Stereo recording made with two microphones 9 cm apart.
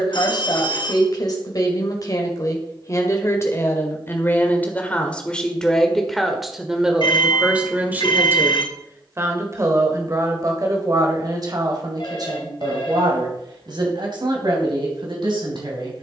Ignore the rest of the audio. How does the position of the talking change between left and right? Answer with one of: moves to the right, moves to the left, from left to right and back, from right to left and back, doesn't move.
moves to the right.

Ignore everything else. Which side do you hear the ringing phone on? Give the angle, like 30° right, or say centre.
60° left.